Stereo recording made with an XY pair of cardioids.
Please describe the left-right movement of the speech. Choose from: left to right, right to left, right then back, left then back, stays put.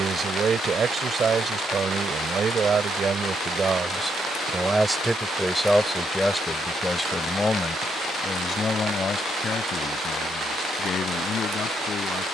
right to left.